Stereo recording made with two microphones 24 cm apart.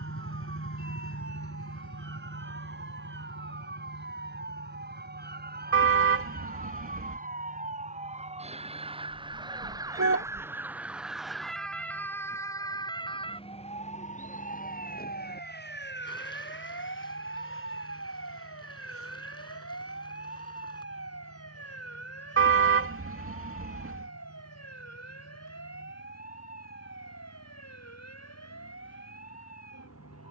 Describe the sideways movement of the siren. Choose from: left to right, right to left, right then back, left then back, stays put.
right to left.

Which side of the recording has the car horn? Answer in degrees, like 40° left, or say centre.
60° right.